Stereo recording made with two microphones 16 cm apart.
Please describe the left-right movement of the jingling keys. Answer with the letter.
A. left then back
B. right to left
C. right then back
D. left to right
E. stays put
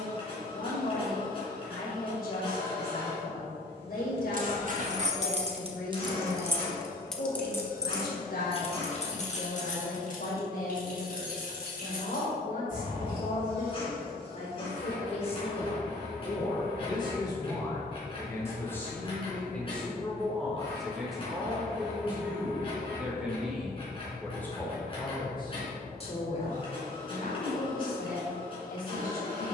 B.